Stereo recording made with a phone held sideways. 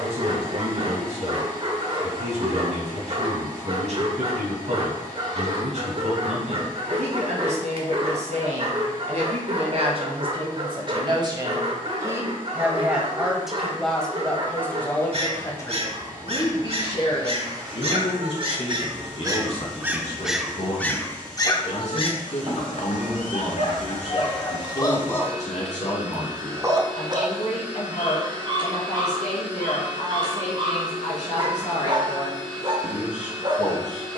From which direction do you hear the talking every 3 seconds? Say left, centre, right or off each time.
right, right, right, right, centre, left, left, left, left, left, left, left.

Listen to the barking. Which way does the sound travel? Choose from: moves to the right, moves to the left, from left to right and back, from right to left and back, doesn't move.
from right to left and back.